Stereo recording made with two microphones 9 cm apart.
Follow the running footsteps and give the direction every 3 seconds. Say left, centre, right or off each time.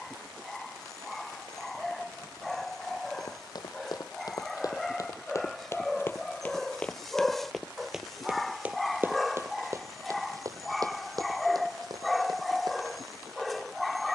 off, left, centre, right, right.